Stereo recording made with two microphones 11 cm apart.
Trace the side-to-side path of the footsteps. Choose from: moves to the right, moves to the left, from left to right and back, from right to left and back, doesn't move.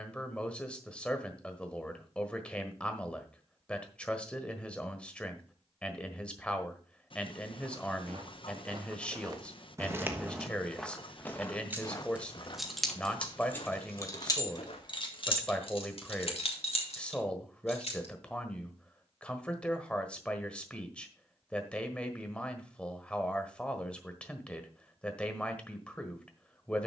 moves to the left.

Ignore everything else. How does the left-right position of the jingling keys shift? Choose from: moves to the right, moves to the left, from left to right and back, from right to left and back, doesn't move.
moves to the left.